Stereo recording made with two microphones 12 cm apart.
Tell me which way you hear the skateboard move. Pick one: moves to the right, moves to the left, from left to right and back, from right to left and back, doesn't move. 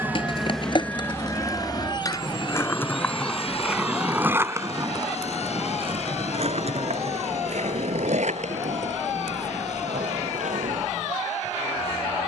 moves to the right.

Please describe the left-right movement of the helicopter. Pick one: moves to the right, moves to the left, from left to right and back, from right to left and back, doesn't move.
moves to the left.